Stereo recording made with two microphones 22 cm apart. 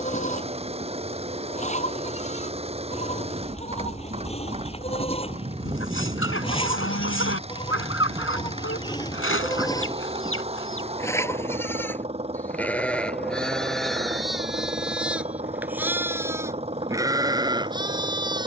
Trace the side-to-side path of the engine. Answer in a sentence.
You can hear the engine stay in one place.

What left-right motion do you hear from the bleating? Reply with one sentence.
You can hear the bleating travel towards the right.